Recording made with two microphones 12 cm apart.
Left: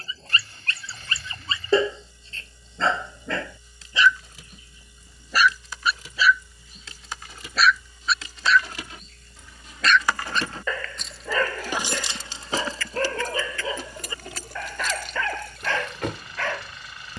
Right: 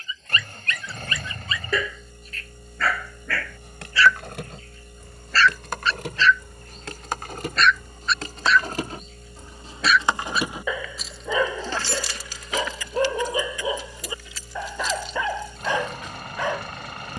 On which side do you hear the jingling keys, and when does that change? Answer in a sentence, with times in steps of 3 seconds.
In this clip you hear the jingling keys not at all from 0 s, on the right from 3 s, in the centre from 9 s and on the left from 12 s.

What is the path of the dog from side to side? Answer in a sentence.
You can hear the dog move to the right.